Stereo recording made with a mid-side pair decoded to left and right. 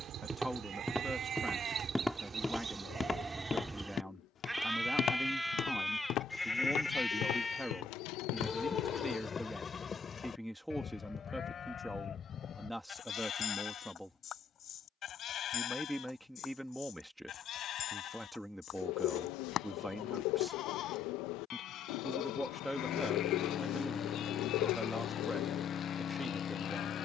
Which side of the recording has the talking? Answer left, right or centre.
centre.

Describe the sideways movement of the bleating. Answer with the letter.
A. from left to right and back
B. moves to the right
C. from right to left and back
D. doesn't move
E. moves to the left
E.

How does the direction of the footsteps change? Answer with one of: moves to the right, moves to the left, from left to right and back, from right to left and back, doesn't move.
moves to the left.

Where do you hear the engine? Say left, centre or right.
left.